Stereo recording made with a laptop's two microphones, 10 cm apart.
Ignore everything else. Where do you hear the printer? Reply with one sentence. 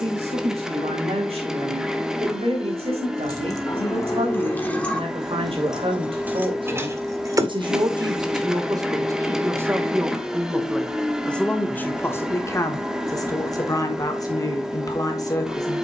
You can hear the printer in the centre.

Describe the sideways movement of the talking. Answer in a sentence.
In this clip you hear the talking travel towards the left.